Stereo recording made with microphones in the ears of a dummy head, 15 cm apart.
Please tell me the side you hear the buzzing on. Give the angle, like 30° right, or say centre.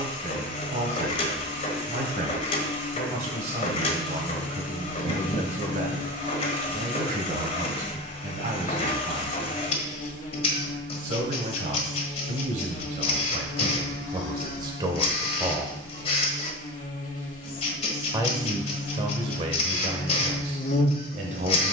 50° left.